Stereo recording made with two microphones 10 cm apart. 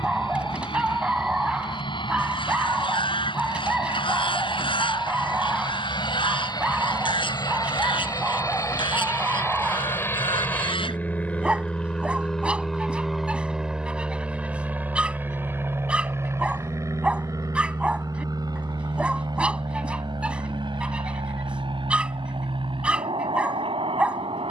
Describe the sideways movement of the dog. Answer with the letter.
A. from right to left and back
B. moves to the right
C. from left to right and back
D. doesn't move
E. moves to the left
D.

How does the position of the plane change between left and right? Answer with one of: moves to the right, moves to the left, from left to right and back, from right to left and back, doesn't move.
moves to the right.